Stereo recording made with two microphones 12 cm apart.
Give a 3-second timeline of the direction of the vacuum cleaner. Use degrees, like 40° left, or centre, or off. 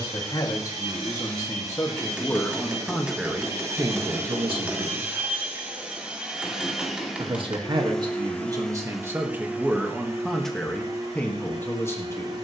40° right, 20° right, centre, 30° right.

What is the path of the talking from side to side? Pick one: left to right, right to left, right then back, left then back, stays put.
right then back.